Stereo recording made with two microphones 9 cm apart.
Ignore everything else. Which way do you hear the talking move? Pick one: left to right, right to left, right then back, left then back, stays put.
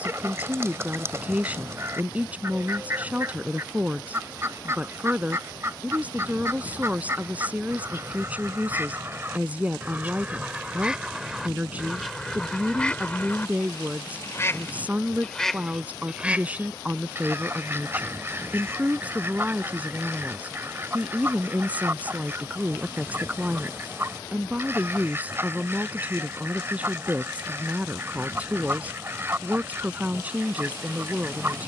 stays put.